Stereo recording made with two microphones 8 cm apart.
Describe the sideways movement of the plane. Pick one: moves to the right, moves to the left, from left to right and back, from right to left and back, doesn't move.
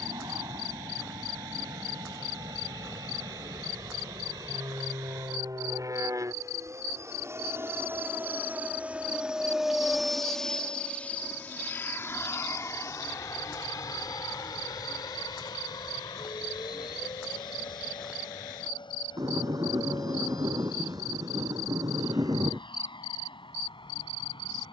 moves to the left.